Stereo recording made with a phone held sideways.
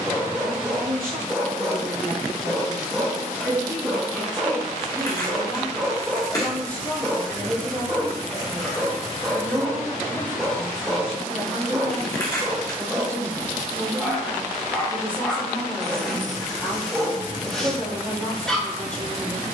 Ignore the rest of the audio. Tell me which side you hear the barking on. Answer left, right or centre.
centre.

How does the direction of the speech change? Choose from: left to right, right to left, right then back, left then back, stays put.
right to left.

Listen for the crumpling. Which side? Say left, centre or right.
left.